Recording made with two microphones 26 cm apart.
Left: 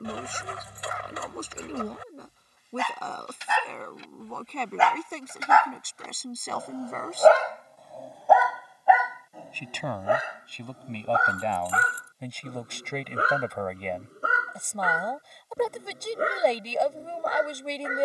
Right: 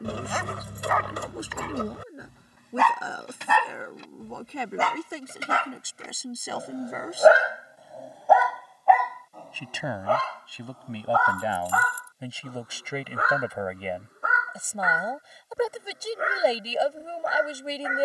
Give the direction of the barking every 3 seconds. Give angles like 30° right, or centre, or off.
70° right, 50° right, 10° right, 20° left, 30° left, 40° left.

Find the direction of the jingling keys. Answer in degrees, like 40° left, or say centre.
50° right.